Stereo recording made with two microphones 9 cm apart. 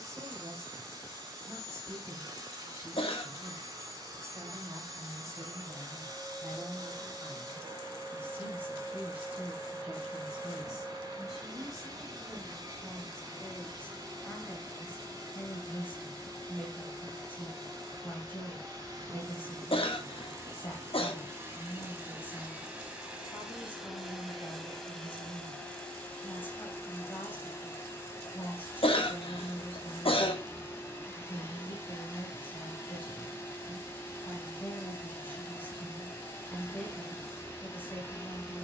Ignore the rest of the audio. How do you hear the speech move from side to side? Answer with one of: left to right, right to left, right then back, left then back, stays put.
right to left.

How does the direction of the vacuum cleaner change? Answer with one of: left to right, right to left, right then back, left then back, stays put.
right to left.